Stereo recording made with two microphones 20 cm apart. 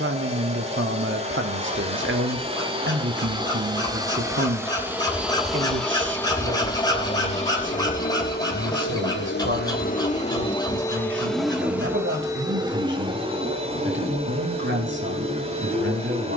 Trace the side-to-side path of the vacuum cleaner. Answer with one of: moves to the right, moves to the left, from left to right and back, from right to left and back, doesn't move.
from right to left and back.